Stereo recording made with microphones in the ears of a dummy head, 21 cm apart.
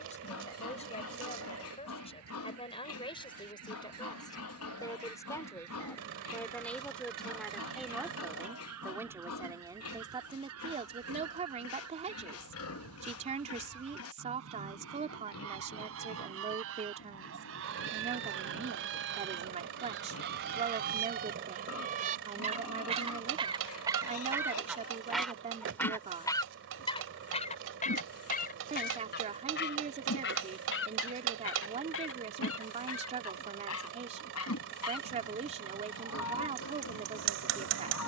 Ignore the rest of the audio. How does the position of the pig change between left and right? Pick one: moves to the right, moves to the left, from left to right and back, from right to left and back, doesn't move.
doesn't move.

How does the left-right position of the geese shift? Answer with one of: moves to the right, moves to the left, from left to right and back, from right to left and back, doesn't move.
moves to the left.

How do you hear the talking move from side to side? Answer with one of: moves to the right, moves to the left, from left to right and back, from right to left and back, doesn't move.
moves to the right.